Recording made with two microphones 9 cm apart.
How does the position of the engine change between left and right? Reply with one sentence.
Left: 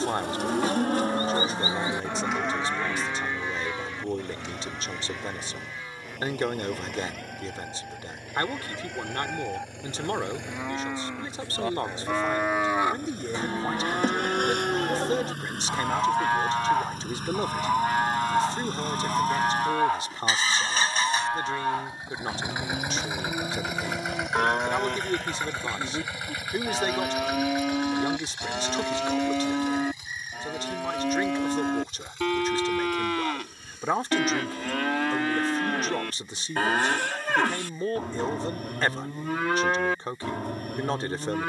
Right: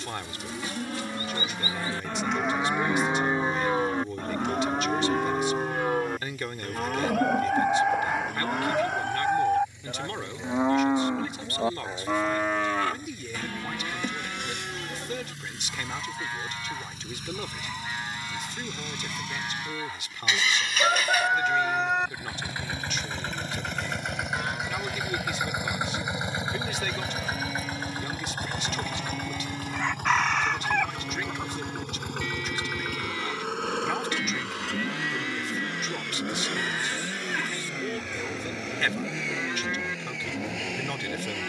In this clip you hear the engine go from the left side to the right.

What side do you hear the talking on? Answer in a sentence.
In this clip you hear the talking on the left.